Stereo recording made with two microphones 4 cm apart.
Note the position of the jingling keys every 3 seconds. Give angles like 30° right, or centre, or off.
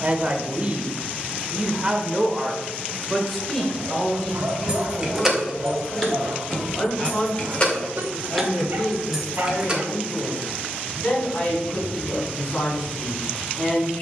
off, 10° right, 20° left, 10° right, off.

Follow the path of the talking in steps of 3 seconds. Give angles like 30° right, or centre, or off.
20° right, 20° left, 30° left, 40° left, 40° left.